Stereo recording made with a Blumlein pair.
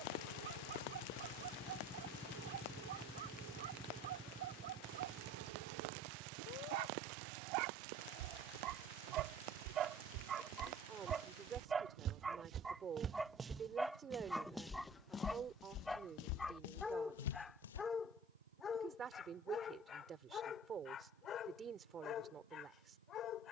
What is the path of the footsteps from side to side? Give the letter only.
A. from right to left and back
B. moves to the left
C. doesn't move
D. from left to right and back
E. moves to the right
B.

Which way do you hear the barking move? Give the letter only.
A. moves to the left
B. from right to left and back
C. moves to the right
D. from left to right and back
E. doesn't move
A.